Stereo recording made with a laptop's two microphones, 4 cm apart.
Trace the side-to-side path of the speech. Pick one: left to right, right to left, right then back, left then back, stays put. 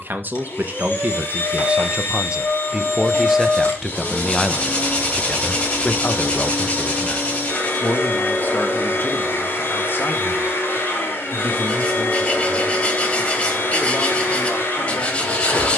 right to left.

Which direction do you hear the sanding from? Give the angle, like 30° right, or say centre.
30° left.